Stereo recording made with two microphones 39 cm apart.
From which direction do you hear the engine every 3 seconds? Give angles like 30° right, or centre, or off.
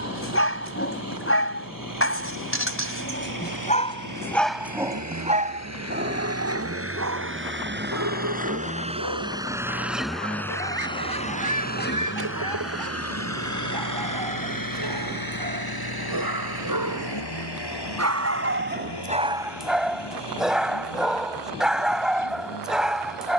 50° right, 50° right, 30° right, 10° left, 40° left, 70° left, 80° left, 80° left.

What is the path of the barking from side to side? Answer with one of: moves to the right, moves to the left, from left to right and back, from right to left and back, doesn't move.
from left to right and back.